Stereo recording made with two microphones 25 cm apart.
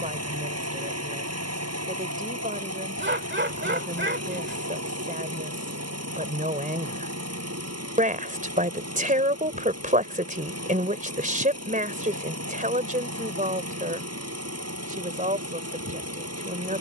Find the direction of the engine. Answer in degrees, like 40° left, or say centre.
80° right.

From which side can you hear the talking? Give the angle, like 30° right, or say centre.
30° right.